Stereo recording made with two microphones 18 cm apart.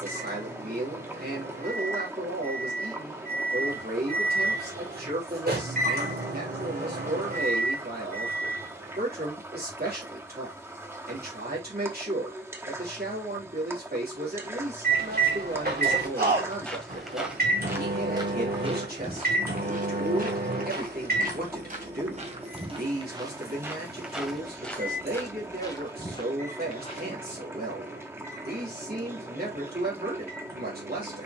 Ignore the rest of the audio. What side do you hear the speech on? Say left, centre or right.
right.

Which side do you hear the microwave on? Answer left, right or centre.
right.